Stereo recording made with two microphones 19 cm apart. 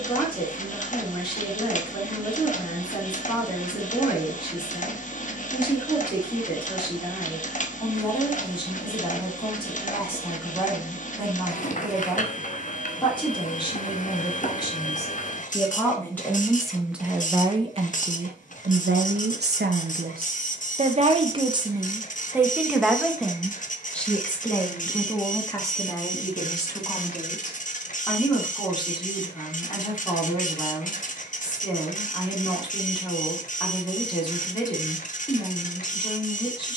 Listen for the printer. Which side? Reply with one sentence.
In this clip you hear the printer on the left.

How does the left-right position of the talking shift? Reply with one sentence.
In this clip you hear the talking move from left to right and back again.